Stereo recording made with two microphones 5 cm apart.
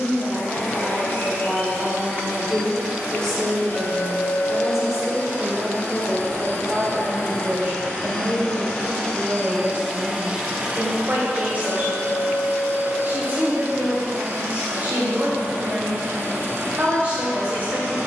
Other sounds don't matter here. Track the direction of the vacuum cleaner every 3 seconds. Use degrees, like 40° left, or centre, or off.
60° left, 50° left, 30° left, 20° right, 60° right, 70° right.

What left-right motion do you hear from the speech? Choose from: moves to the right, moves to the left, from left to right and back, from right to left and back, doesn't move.
moves to the right.